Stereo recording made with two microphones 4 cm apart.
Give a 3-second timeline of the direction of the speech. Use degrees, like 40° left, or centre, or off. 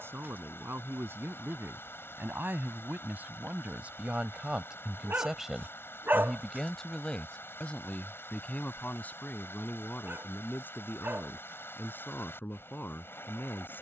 60° right, 30° right, 20° left, 40° left, 50° left.